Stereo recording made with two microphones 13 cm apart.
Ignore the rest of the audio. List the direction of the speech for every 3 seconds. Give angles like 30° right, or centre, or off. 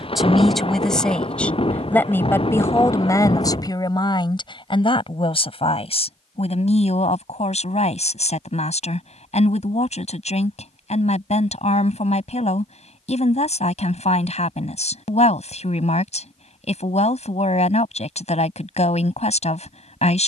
10° left, 40° left, 60° left, 60° left, 60° left, 60° left, 60° left.